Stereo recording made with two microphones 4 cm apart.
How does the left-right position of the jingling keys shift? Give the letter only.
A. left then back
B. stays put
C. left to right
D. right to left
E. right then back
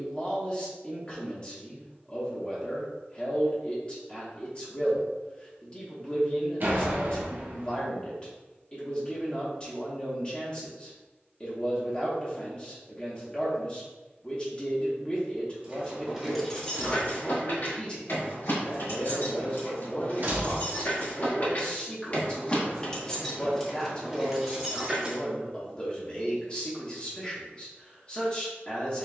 A.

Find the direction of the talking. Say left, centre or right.
left.